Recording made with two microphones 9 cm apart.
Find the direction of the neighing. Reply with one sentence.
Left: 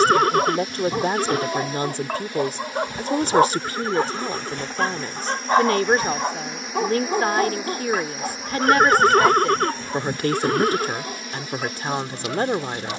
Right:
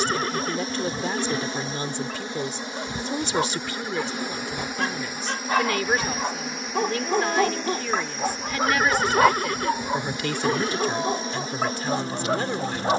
You can hear the neighing on the left.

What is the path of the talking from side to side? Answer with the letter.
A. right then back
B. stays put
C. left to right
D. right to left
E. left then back
B.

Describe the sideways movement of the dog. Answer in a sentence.
In this clip you hear the dog move to the right.